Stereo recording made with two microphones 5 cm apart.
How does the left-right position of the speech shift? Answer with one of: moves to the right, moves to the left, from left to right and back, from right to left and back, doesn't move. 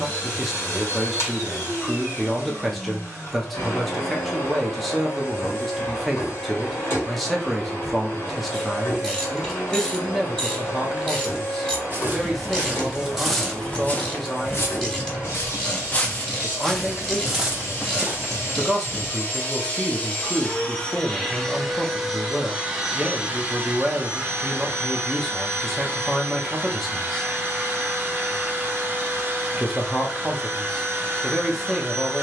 doesn't move.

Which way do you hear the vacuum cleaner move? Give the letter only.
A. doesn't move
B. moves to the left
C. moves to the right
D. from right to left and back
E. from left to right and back
C.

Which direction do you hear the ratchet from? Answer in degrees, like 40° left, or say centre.
20° left.